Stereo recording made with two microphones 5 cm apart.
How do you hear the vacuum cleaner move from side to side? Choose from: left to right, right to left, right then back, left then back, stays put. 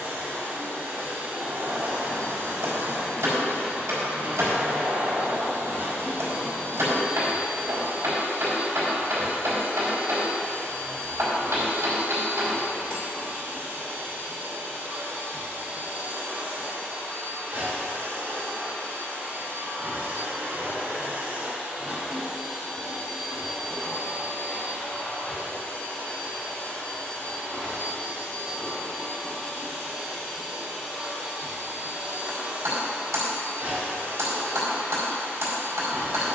left then back.